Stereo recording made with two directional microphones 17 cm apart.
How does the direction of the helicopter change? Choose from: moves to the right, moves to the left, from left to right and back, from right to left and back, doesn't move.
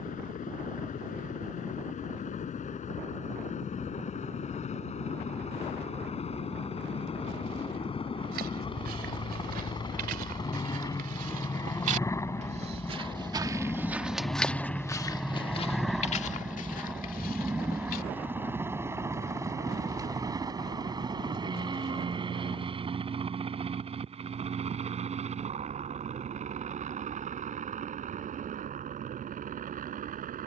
moves to the right.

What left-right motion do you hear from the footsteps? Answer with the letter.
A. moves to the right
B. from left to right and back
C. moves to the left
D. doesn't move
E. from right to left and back
C.